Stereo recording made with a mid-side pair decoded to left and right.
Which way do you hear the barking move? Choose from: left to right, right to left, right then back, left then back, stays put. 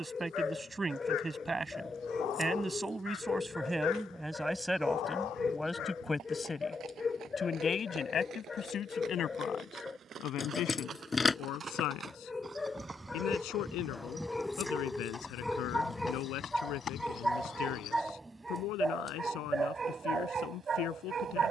left to right.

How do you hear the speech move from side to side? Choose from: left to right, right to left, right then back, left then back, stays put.
right to left.